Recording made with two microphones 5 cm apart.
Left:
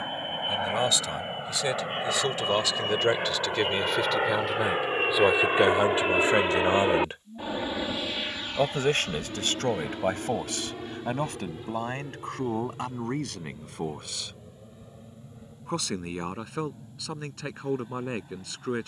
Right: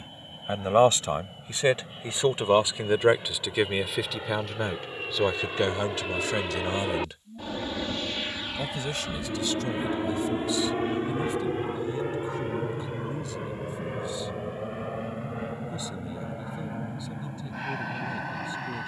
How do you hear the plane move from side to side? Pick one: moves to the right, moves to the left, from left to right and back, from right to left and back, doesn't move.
moves to the right.